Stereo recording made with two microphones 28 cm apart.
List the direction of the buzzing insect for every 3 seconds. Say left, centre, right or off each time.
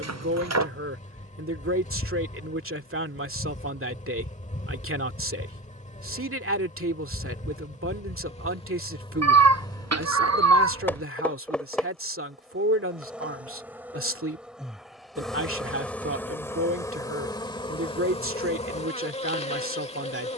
left, left, left, centre, centre, centre, left.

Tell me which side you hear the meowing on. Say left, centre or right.
right.